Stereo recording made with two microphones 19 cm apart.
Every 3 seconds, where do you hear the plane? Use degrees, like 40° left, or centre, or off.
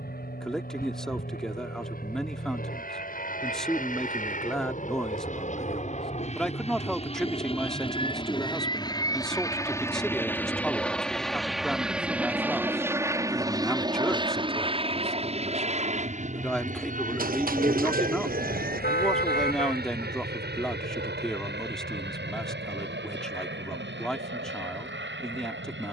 60° left, 50° left, 30° left, 10° left, 20° right, 40° right, 50° right, 60° right, 70° right.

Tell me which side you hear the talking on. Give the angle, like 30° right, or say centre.
centre.